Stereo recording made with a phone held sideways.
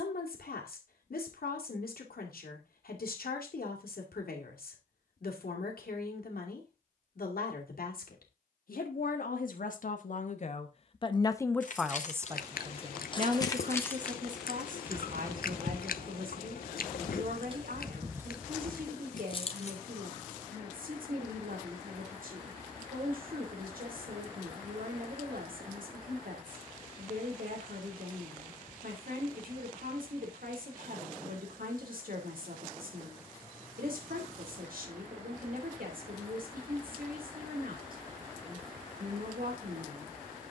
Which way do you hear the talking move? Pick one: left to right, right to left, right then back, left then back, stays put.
left to right.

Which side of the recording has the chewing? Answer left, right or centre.
left.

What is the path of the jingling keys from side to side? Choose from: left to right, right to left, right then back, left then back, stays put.
right then back.